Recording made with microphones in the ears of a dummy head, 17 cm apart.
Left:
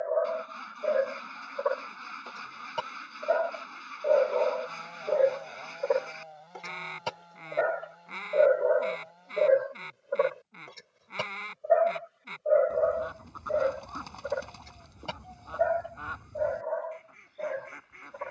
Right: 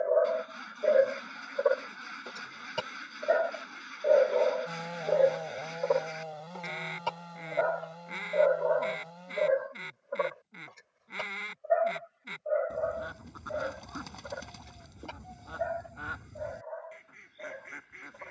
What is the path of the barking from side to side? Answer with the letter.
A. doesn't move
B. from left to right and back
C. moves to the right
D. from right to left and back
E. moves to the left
E.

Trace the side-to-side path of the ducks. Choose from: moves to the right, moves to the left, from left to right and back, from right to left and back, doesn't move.
doesn't move.